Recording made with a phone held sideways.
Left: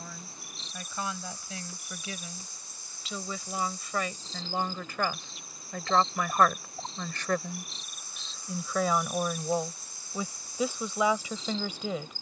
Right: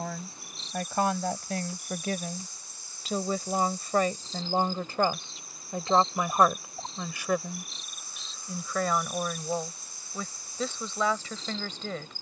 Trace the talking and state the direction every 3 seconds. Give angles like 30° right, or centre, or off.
60° right, 30° right, 10° right, 10° left.